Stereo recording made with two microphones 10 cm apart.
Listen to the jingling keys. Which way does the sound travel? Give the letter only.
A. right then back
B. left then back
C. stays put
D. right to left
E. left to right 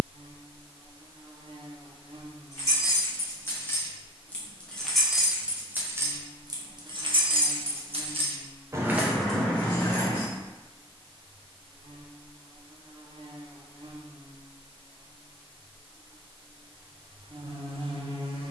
A.